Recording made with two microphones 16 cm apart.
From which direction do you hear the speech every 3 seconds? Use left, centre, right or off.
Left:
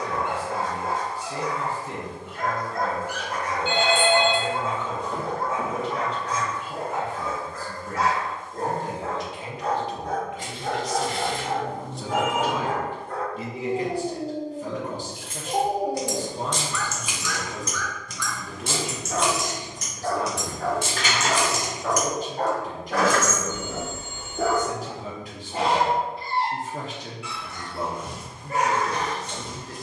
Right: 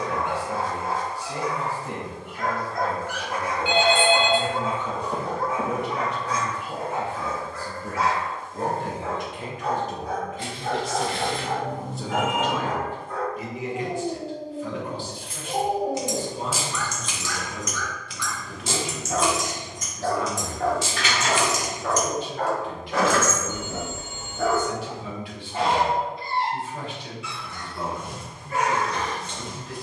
right, right, right, right, left, left, left, left, left, left.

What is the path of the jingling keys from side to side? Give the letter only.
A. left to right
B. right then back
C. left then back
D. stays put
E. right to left
C.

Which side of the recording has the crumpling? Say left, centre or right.
left.